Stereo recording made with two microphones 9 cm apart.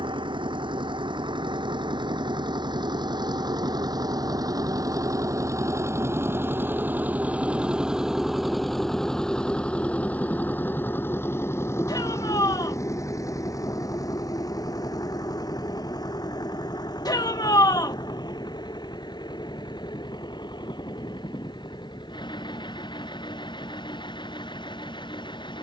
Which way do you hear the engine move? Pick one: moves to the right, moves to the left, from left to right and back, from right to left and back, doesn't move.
moves to the left.